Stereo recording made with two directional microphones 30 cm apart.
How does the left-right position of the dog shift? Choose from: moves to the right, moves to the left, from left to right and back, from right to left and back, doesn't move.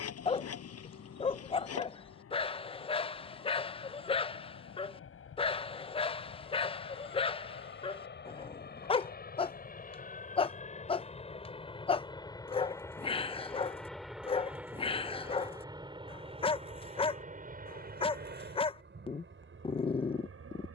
doesn't move.